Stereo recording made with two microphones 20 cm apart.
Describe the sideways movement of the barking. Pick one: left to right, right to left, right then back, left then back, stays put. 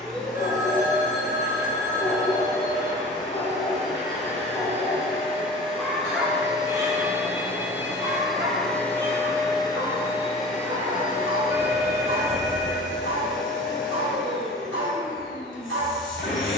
left to right.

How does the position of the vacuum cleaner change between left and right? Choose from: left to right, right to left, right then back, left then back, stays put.
right to left.